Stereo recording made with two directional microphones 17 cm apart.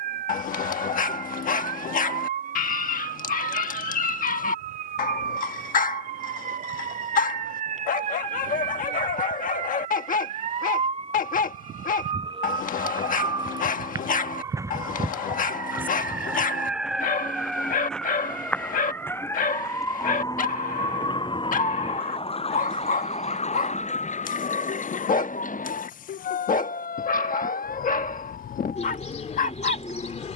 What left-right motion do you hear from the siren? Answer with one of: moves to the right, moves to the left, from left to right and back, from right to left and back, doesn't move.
moves to the left.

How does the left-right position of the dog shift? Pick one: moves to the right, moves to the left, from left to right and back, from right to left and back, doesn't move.
doesn't move.